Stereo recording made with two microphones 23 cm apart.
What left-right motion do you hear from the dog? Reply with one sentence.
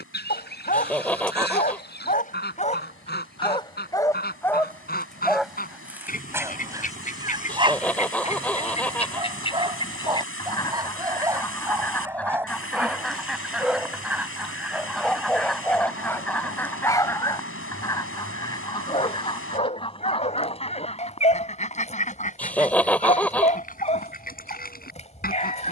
In this clip you hear the dog move from left to right and back again.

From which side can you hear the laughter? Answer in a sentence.
You can hear the laughter in the centre.